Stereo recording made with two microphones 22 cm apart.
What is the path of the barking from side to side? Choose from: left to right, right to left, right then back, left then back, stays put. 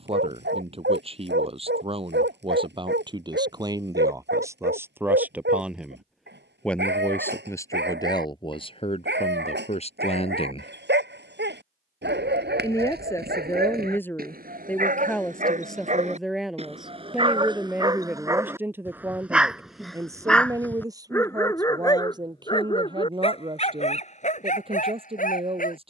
right to left.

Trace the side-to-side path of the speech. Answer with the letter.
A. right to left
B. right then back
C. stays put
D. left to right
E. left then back
E.